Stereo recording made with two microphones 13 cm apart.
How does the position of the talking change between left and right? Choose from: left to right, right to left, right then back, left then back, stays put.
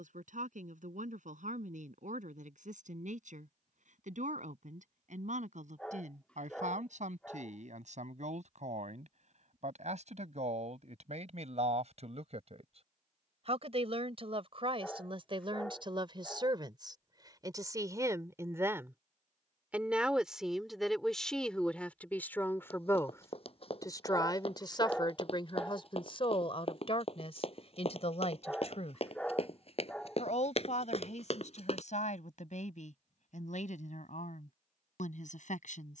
right to left.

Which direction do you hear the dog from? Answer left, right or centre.
centre.